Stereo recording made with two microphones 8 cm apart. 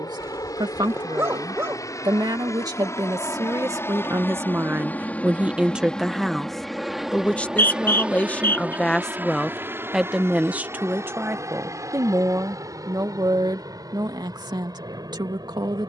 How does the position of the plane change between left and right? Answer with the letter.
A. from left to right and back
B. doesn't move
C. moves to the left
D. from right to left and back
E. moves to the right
E.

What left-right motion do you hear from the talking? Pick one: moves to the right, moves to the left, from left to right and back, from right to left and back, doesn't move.
from right to left and back.